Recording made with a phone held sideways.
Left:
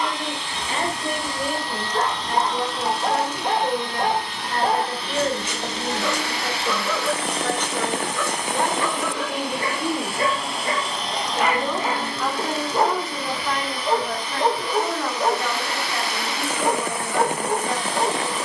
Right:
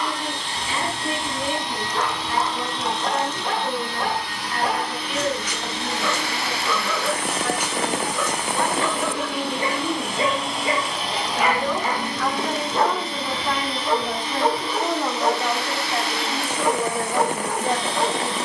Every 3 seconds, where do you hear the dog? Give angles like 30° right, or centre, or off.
30° left, 30° left, centre, 10° right, 20° left, 30° left.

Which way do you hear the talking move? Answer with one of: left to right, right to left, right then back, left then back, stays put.
left to right.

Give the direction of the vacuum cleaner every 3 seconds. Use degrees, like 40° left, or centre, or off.
20° right, 20° left, 20° left, centre, 20° right, 30° right.